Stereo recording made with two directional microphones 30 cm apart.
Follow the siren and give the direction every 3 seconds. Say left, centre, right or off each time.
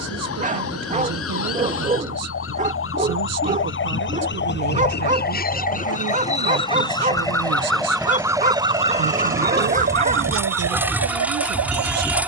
left, left, centre, right.